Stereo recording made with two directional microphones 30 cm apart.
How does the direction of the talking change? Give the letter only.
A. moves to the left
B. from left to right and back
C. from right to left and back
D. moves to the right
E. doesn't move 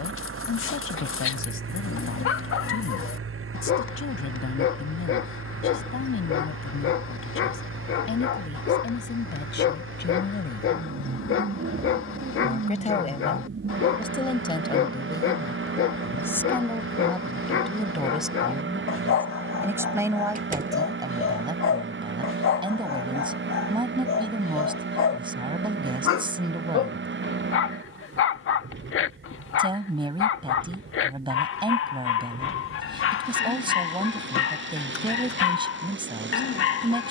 D.